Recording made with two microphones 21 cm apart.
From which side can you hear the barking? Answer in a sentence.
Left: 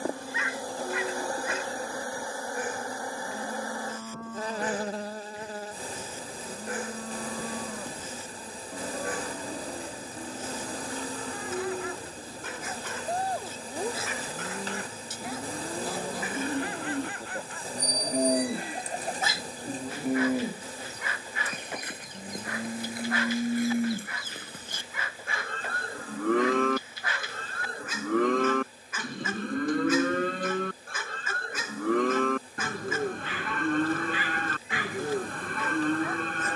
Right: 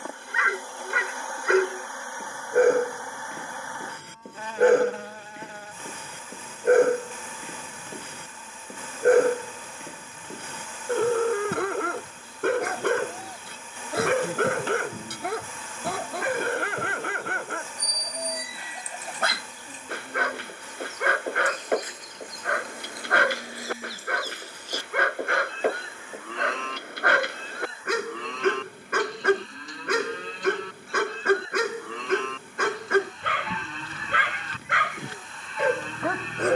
You can hear the barking on the right.